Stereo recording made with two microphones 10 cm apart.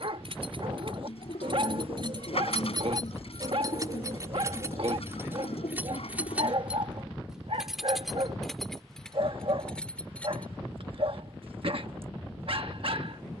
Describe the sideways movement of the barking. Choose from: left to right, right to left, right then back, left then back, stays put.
stays put.